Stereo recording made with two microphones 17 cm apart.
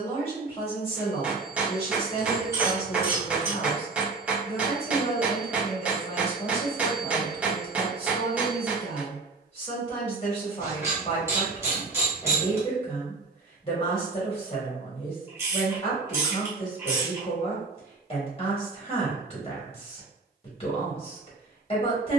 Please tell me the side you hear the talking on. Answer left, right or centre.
left.